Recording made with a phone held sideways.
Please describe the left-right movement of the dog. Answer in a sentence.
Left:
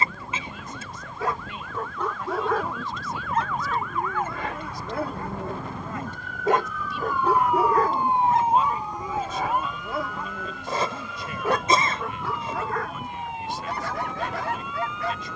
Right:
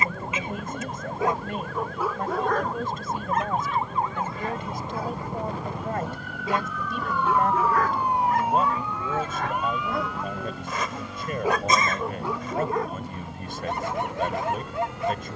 You can hear the dog move from right to left and back again.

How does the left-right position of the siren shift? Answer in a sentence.
In this clip you hear the siren travel towards the left.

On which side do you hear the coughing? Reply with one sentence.
You can hear the coughing on the left.